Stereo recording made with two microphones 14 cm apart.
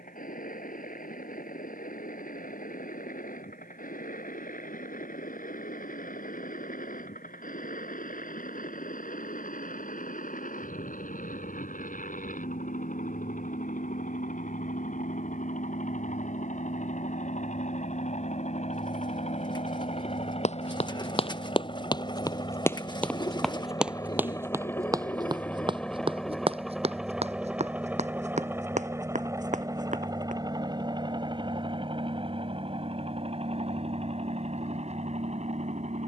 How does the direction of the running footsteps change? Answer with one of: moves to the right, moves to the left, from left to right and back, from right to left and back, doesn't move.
moves to the right.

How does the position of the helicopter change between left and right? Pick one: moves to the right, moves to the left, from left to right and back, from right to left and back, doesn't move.
moves to the right.